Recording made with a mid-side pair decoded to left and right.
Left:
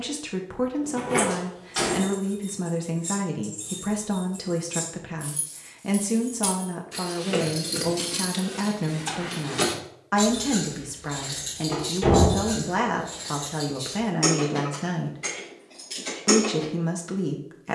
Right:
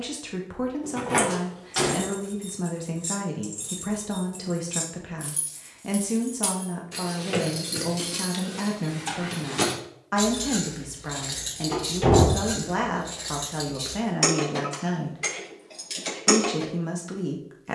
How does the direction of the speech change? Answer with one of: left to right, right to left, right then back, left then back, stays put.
stays put.